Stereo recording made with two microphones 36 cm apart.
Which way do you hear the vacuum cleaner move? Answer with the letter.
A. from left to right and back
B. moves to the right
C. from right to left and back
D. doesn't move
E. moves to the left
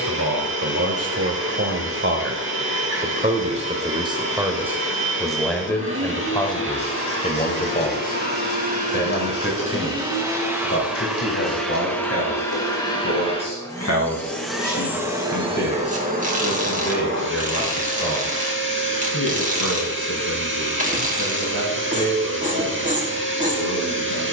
C.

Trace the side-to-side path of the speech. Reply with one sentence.
You can hear the speech move to the left.